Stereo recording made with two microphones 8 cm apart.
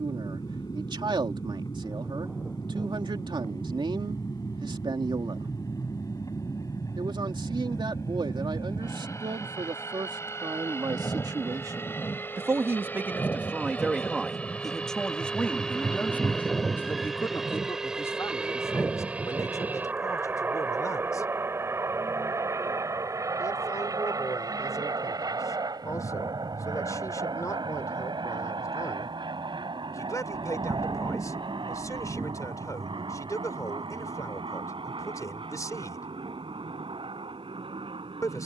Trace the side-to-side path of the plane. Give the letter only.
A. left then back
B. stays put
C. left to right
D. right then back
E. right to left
C.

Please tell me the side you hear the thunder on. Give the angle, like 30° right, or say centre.
20° right.